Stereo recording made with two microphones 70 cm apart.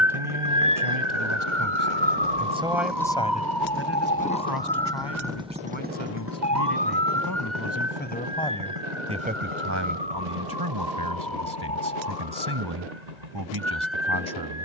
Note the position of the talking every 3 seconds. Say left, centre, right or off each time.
right, left, left, right, right.